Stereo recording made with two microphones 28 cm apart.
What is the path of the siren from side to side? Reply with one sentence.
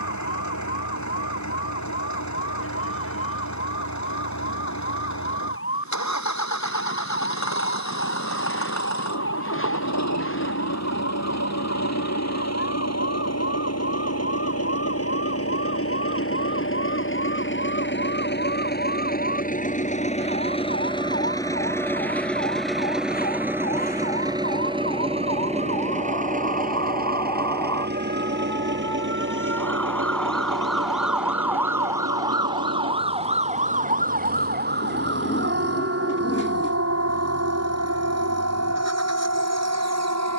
In this clip you hear the siren move from left to right.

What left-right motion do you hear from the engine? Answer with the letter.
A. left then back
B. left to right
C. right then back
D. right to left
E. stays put
B.